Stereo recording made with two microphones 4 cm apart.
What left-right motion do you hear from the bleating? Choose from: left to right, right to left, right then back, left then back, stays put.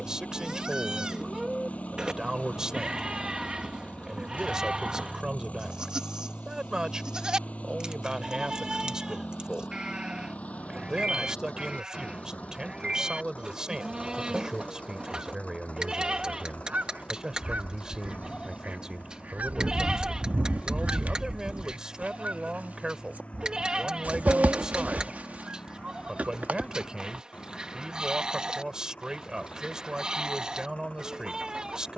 stays put.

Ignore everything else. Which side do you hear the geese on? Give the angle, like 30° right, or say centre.
40° right.